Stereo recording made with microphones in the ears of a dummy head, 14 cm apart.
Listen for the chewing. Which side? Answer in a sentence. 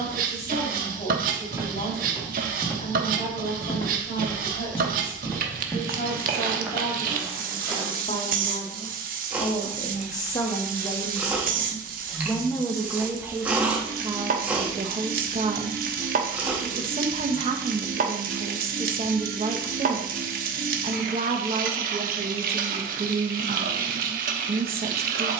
In this clip you hear the chewing in the centre.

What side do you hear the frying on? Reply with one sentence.
In this clip you hear the frying on the right.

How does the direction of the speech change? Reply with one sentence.
You can hear the speech travel towards the right.